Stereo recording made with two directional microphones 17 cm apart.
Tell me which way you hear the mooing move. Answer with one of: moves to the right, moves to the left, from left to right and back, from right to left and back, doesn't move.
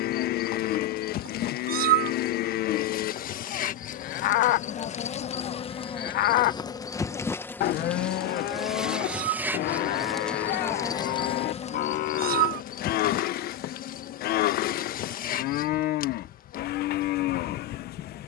doesn't move.